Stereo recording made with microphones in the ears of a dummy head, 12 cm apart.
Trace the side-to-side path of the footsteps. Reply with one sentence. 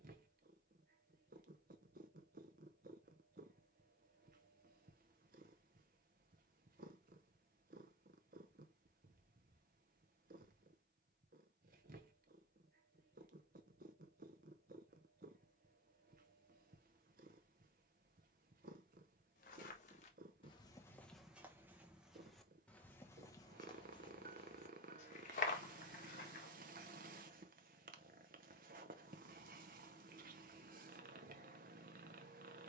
In this clip you hear the footsteps move from left to right and back again.